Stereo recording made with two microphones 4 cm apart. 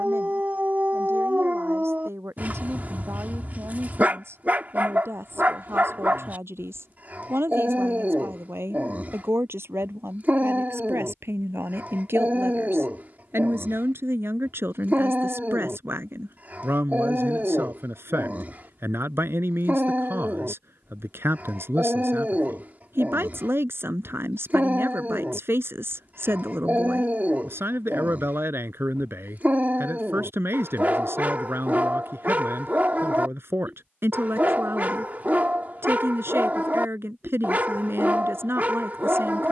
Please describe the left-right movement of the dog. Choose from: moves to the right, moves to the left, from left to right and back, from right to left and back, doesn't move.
doesn't move.